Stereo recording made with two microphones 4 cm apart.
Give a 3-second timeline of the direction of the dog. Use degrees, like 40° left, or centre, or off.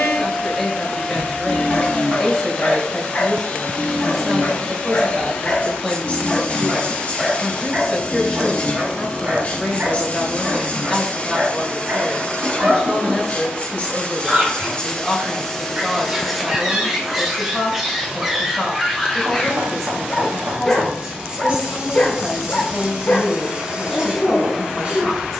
40° left, 30° left, 10° right, 40° right, 30° right, 10° right, centre, 30° left, 30° left.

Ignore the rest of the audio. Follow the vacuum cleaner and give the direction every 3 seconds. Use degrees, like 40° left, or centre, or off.
30° left, 30° left, 30° left, 30° left, 30° left, 10° left, 10° right, 20° right, 20° right.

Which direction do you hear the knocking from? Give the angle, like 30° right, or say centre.
60° right.